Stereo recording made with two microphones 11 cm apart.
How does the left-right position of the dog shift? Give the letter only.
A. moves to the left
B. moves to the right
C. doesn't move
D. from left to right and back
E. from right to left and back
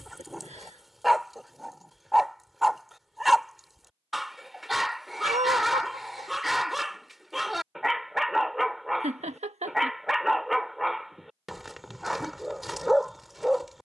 C.